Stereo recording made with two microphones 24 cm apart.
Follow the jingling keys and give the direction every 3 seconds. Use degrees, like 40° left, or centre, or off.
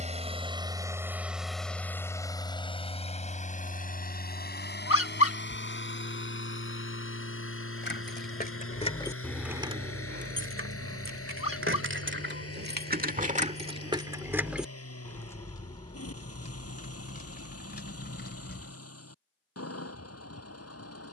off, off, 40° left, 40° right, 30° right, 30° left, 40° left.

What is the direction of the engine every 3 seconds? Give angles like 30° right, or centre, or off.
centre, 40° left, 60° left, 60° left, 70° left, 70° left, 70° left.